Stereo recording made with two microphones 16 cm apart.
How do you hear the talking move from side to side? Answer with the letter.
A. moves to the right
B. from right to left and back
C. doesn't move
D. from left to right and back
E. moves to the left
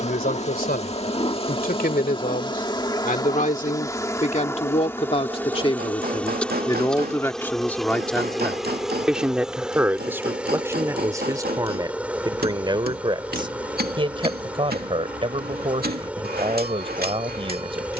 A.